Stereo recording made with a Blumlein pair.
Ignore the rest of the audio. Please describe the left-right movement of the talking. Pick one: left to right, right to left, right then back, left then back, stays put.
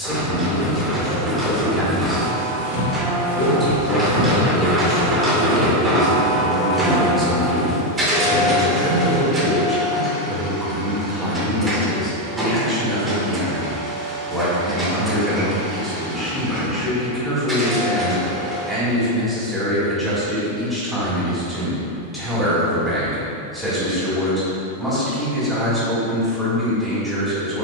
stays put.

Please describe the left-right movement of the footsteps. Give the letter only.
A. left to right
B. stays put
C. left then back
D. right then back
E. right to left
D.